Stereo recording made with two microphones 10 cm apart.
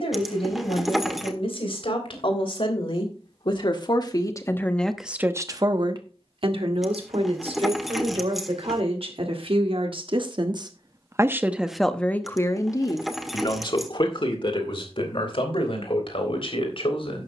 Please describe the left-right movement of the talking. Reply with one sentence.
You can hear the talking move from left to right and back again.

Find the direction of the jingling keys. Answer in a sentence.
You can hear the jingling keys in the centre.